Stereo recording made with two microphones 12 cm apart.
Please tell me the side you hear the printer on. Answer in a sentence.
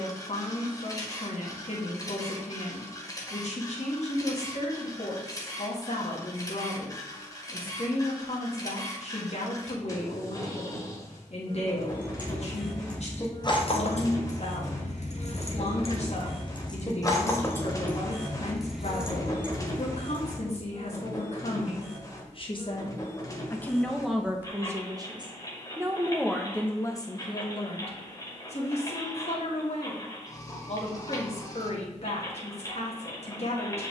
In this clip you hear the printer on the left.